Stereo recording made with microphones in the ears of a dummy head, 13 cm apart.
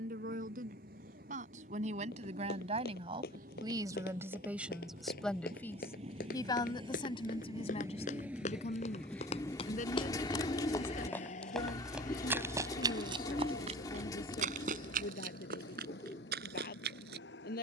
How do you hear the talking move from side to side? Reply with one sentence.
In this clip you hear the talking move from right to left.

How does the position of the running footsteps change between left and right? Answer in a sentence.
You can hear the running footsteps travel towards the right.